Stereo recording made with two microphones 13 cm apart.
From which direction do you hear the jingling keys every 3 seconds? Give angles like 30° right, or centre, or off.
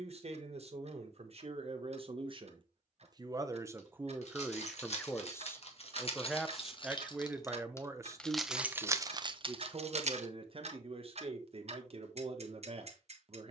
off, 50° left, 20° left, 40° right, off.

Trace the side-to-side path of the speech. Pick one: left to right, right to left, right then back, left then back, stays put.
left then back.